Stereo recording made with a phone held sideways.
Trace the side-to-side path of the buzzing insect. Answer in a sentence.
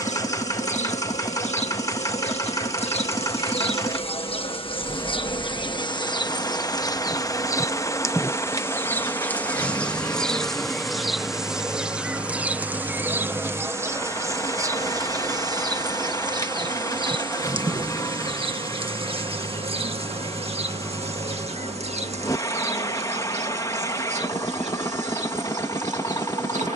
In this clip you hear the buzzing insect go from the left side to the right.